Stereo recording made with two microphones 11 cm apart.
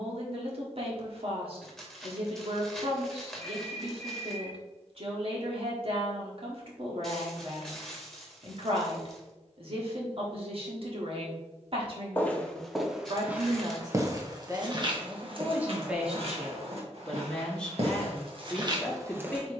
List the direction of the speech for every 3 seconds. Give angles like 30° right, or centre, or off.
50° right, 50° right, 50° right, 50° right, 40° right, centre, 10° left.